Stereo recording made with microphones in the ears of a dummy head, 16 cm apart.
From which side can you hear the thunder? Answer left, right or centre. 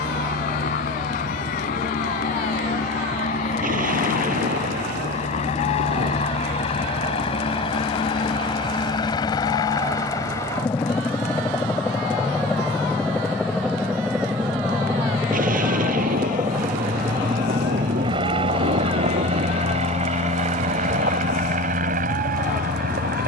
right.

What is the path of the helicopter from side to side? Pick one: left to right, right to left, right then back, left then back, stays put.
left to right.